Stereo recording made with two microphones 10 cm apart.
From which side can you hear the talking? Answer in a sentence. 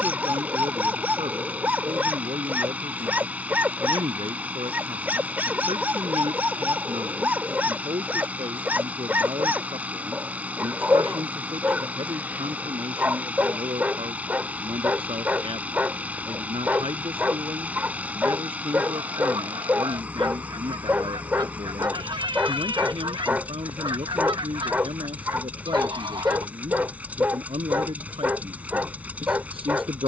You can hear the talking on the right.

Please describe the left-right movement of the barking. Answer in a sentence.
You can hear the barking stay in one place.